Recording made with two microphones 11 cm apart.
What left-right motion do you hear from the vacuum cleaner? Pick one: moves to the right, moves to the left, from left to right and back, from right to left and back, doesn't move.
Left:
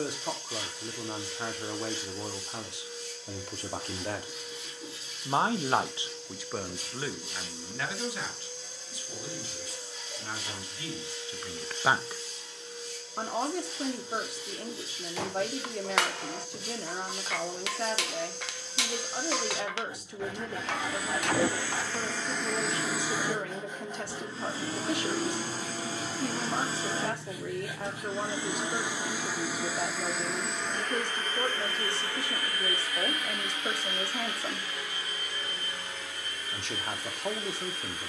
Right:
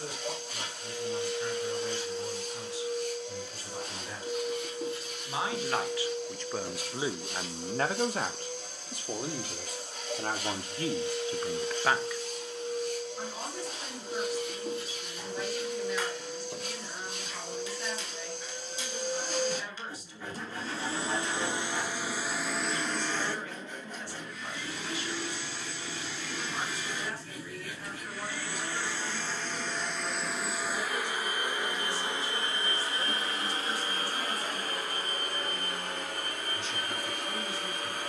from right to left and back.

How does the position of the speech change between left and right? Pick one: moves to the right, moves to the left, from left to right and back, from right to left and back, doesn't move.
from left to right and back.